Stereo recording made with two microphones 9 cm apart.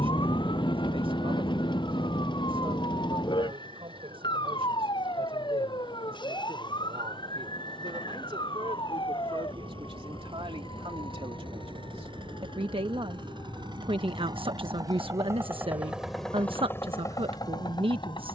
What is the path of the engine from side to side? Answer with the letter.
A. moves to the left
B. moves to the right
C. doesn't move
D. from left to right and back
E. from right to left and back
A.